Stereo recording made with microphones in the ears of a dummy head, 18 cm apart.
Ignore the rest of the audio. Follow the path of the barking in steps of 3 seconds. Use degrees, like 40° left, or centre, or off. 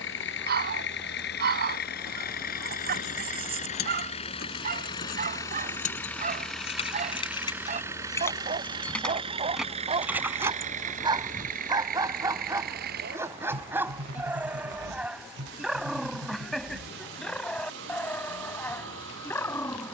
50° right, 50° right, 40° right, 30° right, 10° right, centre, 10° left.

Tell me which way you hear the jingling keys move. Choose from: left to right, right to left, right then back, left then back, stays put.
left to right.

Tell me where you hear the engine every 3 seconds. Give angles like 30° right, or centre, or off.
50° left, 30° left, 10° right, 30° right, 50° right, 60° right, 60° right.